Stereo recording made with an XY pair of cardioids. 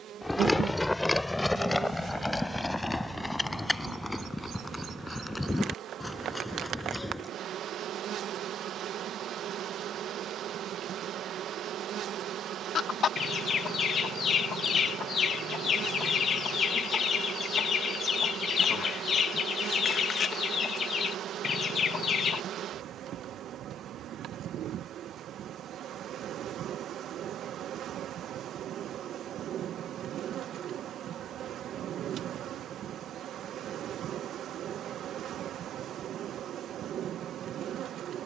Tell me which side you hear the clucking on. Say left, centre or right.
left.